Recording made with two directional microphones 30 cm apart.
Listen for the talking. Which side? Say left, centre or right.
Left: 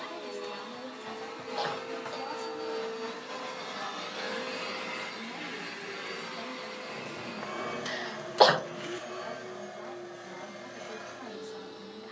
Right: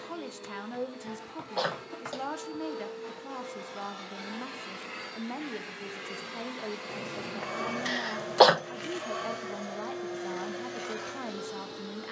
right.